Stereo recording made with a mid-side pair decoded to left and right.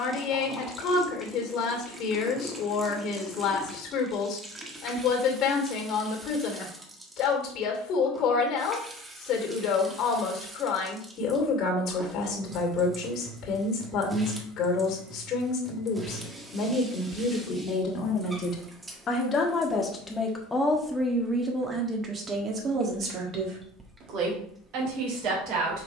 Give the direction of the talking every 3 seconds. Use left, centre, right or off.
left, left, left, left, left, left, left, right, right.